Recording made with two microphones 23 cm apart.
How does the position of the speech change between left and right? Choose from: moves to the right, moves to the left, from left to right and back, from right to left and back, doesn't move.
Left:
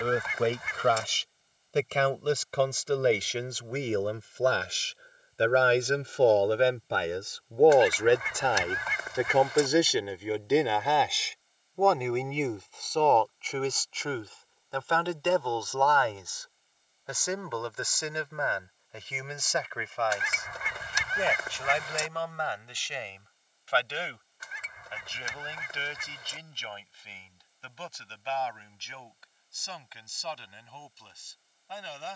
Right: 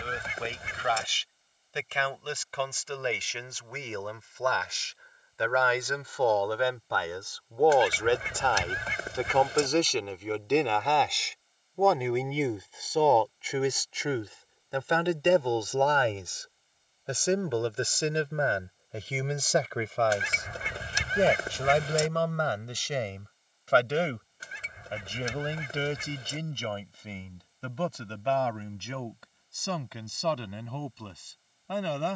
moves to the right.